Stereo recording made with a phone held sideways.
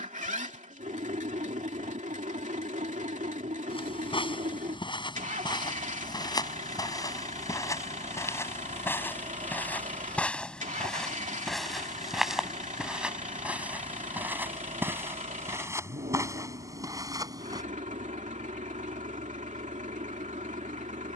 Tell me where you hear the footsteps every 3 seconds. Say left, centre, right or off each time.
off, left, left, centre, centre, right, off.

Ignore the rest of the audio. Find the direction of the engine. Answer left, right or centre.
right.